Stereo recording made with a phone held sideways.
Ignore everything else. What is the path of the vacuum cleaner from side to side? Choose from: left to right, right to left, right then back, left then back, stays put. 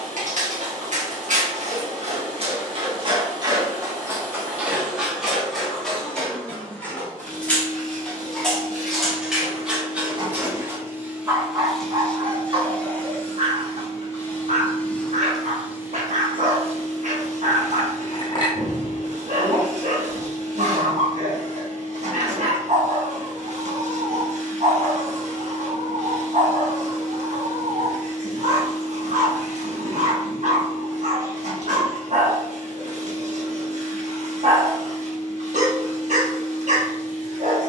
left then back.